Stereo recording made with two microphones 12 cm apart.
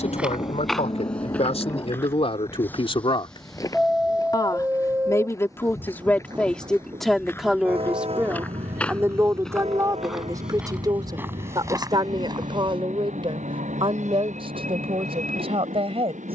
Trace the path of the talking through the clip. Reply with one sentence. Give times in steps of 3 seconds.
You can hear the talking on the left from 0 s, in the centre from 6 s and on the right from 9 s.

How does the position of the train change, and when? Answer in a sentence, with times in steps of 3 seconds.
In this clip you hear the train on the left from 0 s, in the centre from 3 s and on the right from 6 s.